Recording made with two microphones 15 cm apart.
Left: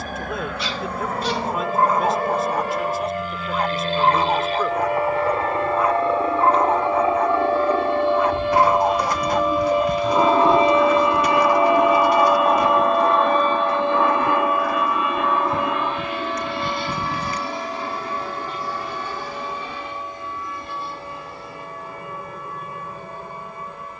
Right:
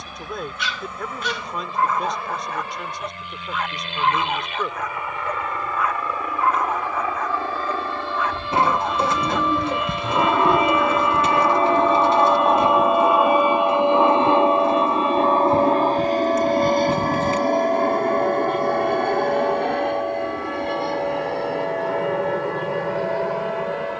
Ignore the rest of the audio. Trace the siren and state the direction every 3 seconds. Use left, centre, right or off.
left, left, left, left, centre, right, right, right.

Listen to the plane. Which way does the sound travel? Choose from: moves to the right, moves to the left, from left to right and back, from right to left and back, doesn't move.
moves to the right.